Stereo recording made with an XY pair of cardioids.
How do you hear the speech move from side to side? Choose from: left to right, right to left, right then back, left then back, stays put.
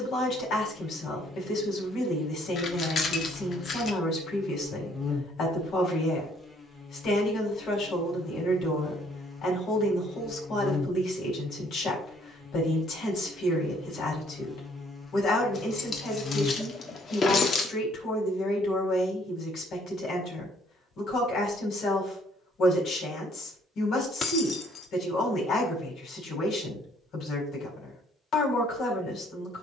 stays put.